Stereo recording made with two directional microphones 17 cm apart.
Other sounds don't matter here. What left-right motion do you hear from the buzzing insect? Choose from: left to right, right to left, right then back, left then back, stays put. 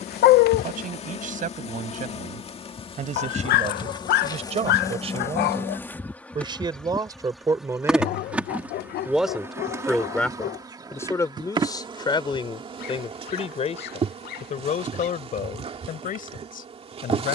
left to right.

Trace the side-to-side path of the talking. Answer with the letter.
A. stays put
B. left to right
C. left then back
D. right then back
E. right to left
E.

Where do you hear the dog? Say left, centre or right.
left.